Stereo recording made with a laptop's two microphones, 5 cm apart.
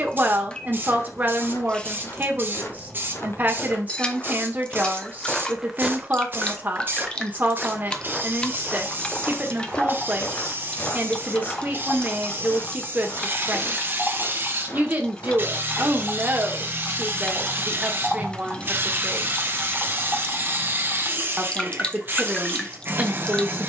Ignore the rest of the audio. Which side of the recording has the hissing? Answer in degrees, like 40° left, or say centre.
40° right.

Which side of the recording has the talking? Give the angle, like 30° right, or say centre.
30° right.